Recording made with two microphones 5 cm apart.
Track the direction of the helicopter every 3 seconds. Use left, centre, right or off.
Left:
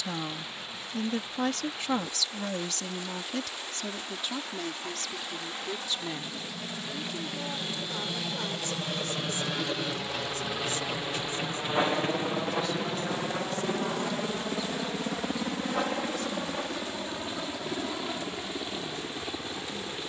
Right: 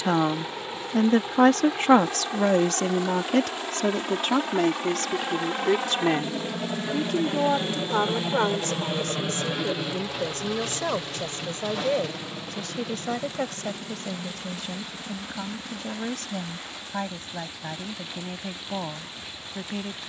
right, right, right, centre, left, left, left.